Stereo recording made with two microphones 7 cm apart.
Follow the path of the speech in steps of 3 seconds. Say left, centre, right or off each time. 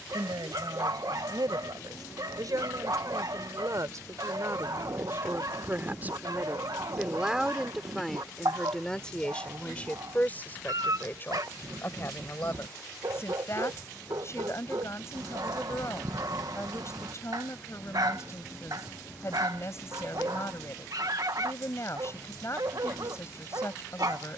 right, right, centre, left, left, left, left, left.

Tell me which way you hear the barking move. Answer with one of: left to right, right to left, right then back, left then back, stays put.
stays put.